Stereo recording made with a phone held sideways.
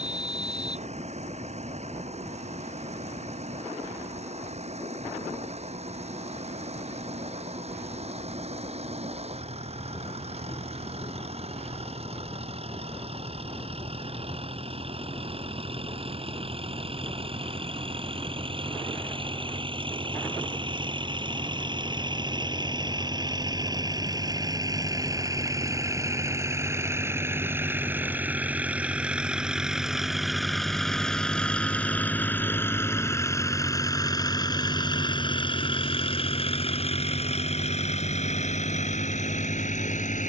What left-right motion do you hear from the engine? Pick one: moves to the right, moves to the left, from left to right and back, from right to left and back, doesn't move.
moves to the left.